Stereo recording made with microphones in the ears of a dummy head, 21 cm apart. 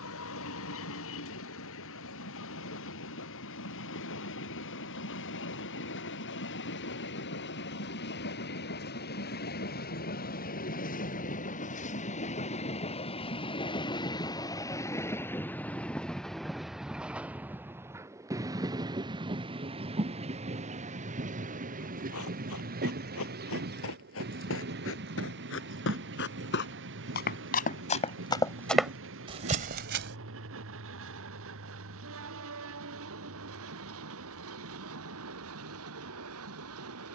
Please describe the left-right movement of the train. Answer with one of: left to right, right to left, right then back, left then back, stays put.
left to right.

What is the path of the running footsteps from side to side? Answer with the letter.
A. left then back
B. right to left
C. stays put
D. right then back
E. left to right
E.